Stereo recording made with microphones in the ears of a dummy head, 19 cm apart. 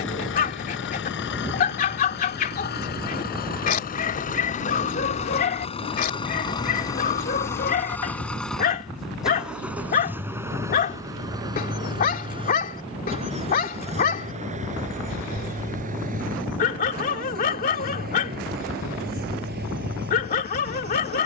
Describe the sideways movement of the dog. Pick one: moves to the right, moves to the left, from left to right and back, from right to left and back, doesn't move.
doesn't move.